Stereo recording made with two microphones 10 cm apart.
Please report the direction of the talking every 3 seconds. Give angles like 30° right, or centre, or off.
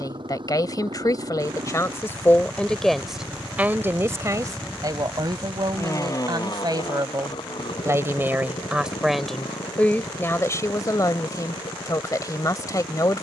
30° left, 30° right, 30° right, 20° left, 40° left.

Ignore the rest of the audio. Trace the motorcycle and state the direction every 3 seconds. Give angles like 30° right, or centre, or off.
50° right, centre, 50° left, 70° left, 80° left.